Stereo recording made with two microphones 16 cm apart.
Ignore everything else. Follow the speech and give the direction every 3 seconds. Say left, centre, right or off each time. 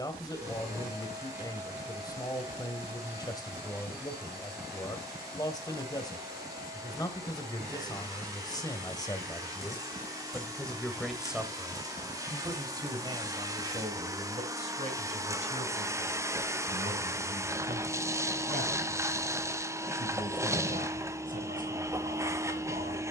left, left, left, centre, right, right, right, right.